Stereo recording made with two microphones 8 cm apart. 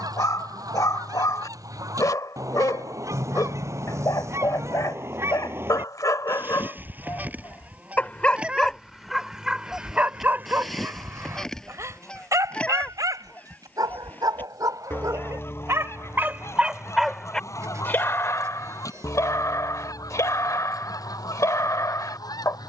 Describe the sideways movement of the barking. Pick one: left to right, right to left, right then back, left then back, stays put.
right then back.